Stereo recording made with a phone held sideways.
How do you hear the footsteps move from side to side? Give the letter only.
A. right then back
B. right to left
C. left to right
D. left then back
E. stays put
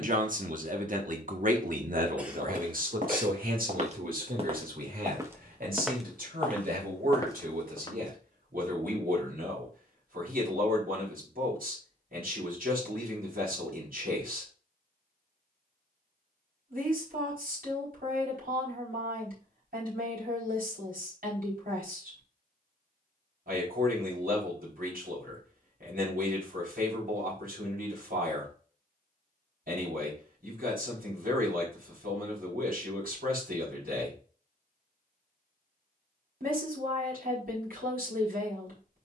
B.